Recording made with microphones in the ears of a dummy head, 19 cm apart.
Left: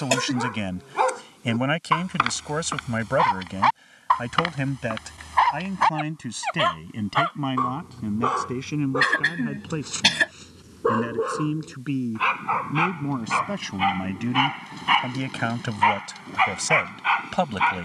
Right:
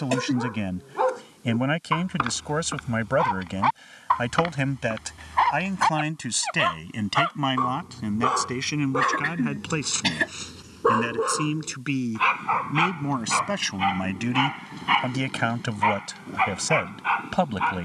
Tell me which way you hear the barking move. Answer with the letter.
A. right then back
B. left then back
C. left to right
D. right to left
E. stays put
A.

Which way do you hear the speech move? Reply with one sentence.
You can hear the speech go right and come back.